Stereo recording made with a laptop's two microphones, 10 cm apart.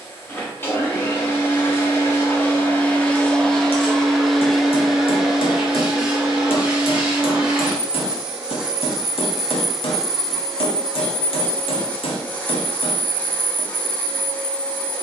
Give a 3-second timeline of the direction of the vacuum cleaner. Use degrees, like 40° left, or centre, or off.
20° left, centre, 10° right, 10° left, 20° left.